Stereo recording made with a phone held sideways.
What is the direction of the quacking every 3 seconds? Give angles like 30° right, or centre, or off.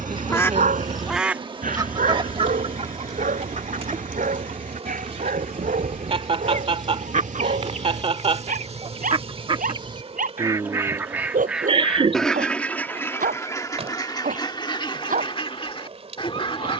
20° right, 60° right, 60° right, 20° right, 20° left, 40° left.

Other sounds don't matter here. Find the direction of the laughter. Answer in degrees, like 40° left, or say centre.
40° right.